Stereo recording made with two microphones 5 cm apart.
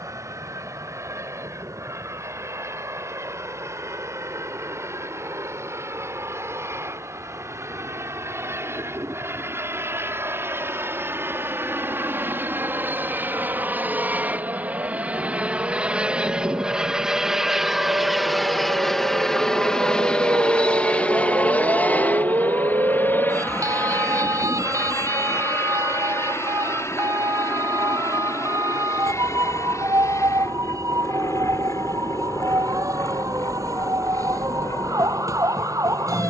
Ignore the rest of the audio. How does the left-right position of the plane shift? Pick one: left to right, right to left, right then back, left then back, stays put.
right to left.